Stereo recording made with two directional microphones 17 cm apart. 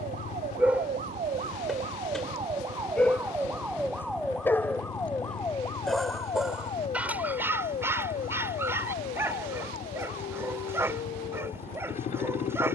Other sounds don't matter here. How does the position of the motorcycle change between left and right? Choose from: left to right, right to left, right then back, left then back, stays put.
stays put.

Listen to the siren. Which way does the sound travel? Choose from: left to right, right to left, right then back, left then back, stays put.
right to left.